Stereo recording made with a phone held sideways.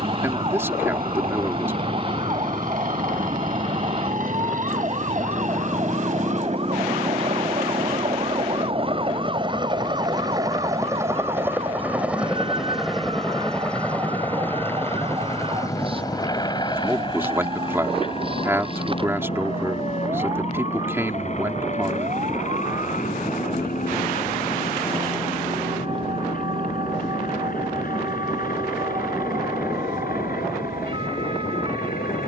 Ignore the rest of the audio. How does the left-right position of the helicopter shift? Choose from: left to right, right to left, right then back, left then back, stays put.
right to left.